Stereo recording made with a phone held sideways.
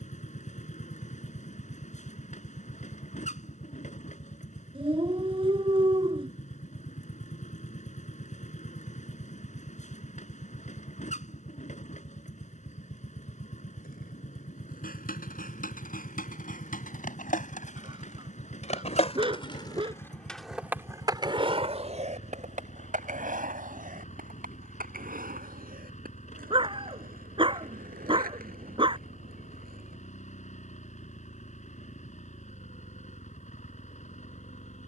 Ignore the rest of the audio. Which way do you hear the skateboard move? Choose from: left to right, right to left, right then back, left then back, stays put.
left to right.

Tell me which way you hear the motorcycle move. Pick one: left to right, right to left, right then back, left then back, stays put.
stays put.